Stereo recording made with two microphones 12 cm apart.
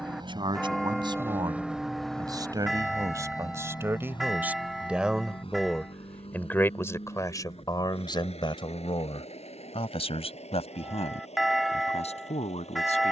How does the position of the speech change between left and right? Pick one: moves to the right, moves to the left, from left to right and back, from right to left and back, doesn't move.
moves to the left.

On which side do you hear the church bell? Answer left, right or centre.
centre.